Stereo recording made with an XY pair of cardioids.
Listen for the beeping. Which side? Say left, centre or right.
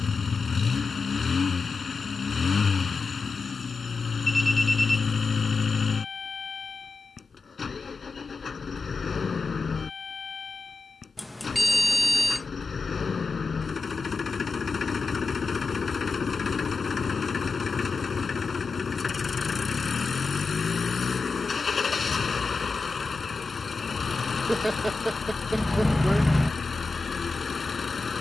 centre.